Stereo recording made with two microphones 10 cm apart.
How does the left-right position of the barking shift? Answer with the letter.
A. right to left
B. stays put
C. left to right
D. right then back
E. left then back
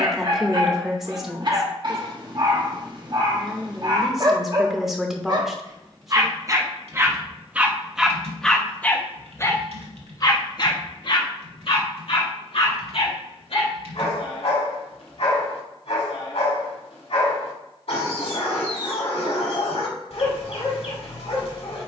A.